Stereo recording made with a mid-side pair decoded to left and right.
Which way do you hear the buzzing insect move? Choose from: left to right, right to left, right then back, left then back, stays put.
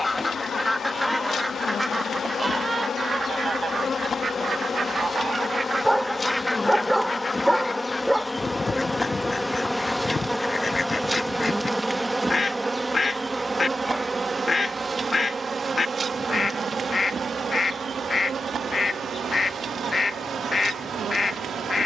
left to right.